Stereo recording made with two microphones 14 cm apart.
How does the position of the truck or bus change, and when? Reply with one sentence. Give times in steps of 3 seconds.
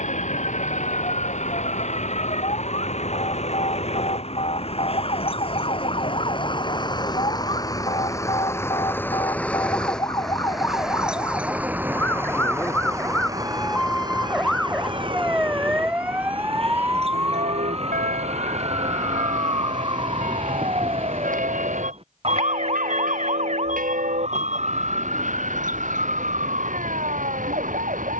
In this clip you hear the truck or bus on the left from 0 s, in the centre from 9 s and on the right from 12 s.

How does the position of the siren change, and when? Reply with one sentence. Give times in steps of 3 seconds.
In this clip you hear the siren on the left from 0 s, in the centre from 12 s and on the right from 18 s.